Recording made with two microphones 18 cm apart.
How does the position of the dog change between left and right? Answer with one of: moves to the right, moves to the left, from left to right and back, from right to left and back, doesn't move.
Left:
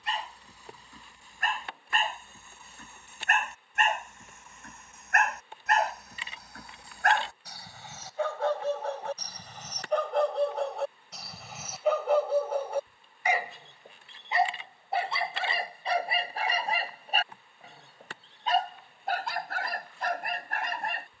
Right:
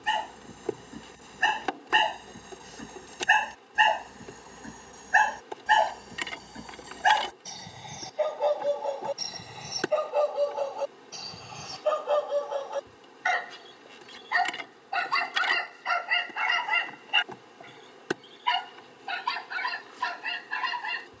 moves to the left.